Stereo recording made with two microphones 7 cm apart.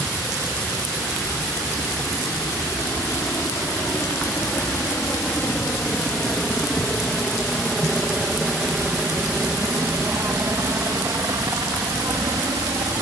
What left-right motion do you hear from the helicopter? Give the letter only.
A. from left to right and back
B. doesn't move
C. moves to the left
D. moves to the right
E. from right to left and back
D.